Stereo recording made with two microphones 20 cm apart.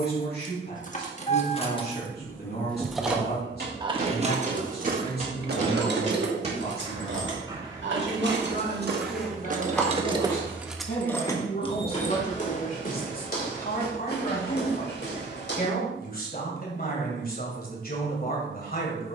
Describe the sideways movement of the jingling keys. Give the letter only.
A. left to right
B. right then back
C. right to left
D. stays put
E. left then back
B.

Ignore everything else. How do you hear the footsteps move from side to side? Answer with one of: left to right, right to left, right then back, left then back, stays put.
right to left.